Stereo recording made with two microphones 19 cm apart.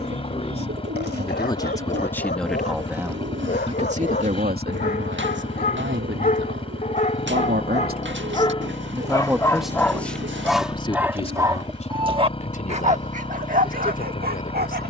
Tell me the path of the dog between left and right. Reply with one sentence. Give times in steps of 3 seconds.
In this clip you hear the dog on the left from 0 s, in the centre from 9 s and on the right from 12 s.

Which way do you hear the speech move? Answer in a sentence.
You can hear the speech go right and come back.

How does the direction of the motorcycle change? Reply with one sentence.
In this clip you hear the motorcycle stay put.